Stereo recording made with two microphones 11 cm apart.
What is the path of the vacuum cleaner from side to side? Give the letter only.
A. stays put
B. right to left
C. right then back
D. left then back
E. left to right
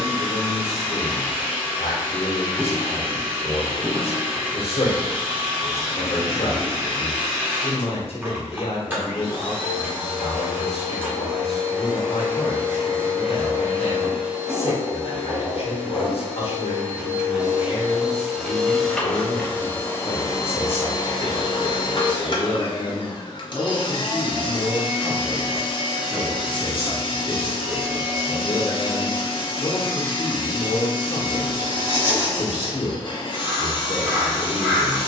B.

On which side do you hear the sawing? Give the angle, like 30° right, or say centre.
30° right.